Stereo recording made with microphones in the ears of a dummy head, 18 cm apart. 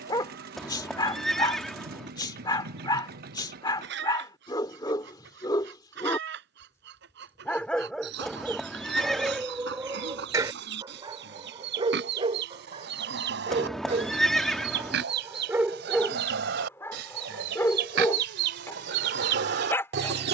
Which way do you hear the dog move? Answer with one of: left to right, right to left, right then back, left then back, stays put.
right then back.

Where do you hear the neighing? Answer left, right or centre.
centre.